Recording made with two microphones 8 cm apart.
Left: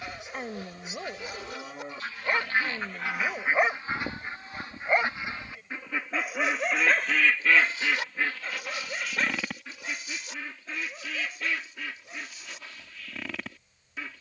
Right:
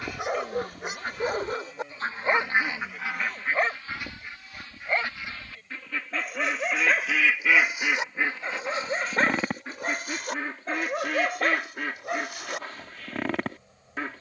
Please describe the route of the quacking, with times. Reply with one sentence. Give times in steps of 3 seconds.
You can hear the quacking on the right from 0 s, on the left from 3 s, in the centre from 6 s and on the right from 9 s.